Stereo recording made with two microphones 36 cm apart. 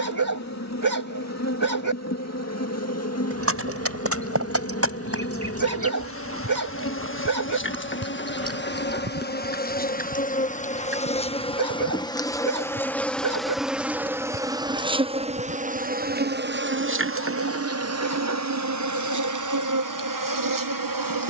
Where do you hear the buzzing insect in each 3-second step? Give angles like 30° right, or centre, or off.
50° left, 40° left, 30° left, 20° left, centre, 30° right, 60° right.